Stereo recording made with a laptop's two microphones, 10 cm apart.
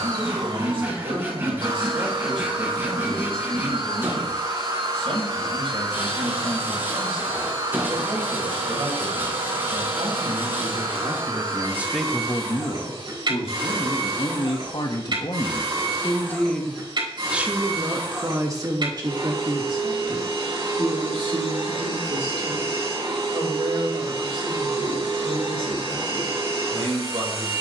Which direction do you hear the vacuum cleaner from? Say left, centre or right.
right.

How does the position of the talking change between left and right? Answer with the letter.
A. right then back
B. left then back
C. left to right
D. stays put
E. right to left
B.